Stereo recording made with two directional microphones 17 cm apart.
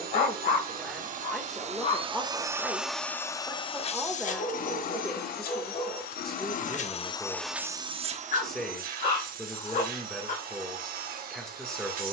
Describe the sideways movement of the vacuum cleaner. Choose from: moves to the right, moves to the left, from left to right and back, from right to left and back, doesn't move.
from right to left and back.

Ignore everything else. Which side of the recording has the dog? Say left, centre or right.
left.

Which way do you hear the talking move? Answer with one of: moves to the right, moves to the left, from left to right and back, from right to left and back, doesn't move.
doesn't move.